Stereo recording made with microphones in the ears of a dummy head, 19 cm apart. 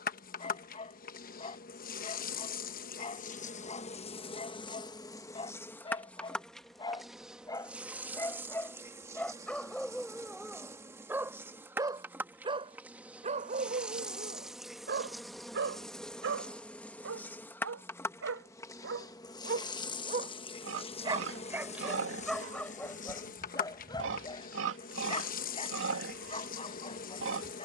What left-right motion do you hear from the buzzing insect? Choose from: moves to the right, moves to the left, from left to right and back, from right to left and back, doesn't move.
from left to right and back.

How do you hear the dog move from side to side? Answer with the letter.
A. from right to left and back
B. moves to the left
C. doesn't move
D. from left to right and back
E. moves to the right
D.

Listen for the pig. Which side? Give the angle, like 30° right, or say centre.
60° right.